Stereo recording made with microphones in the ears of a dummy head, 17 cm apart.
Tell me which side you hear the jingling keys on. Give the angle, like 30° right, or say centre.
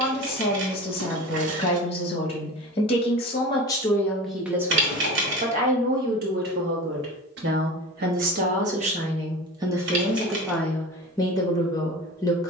70° right.